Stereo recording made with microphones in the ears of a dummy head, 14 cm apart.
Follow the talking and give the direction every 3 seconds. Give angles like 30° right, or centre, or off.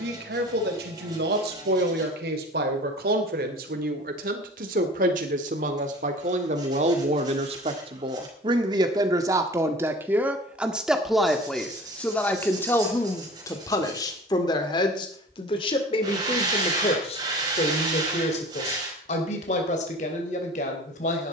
70° right, 60° right, 40° right, 10° right, 20° left, 40° left, 50° left.